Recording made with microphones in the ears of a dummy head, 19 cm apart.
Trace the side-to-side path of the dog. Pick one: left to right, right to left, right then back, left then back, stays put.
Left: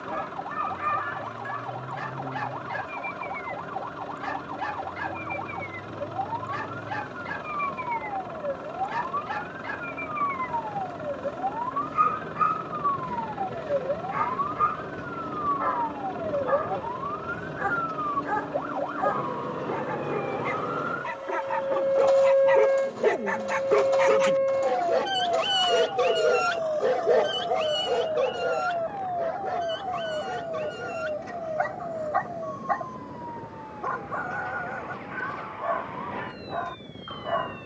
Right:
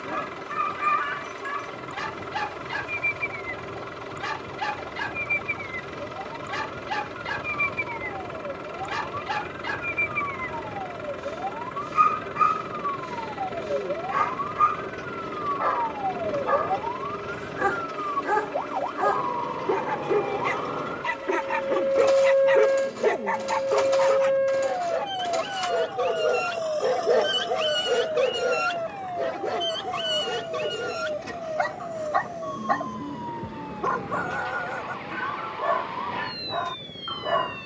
left then back.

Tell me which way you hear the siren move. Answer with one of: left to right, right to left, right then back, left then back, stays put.
left to right.